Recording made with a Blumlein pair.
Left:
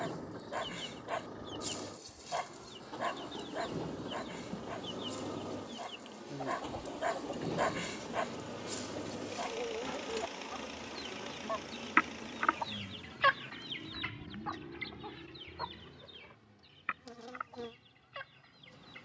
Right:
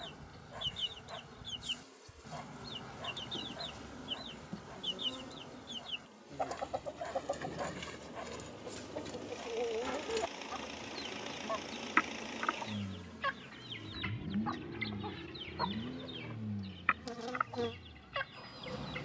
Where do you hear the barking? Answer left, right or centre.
left.